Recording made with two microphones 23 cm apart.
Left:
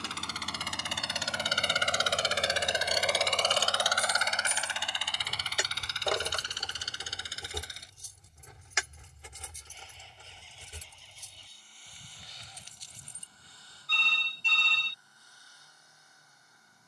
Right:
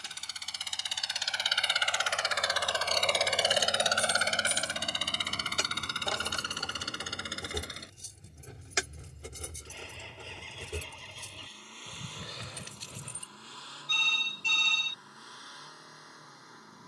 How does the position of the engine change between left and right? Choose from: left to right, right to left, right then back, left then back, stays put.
left to right.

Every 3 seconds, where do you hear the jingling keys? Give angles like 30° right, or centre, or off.
off, 10° left, 20° right, 60° right, 80° right, off.